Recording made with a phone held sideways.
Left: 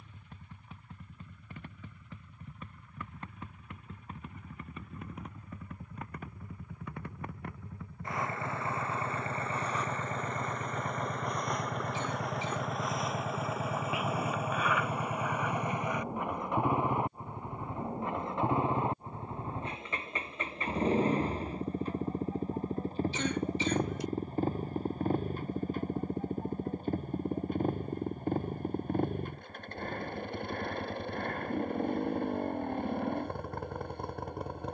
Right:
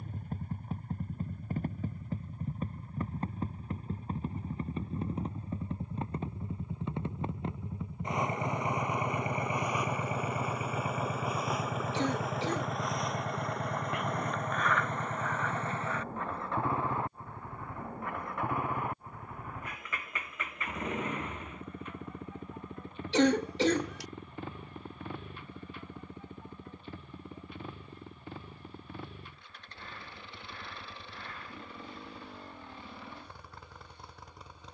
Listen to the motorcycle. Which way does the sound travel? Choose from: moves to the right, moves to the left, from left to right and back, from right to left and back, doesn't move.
moves to the left.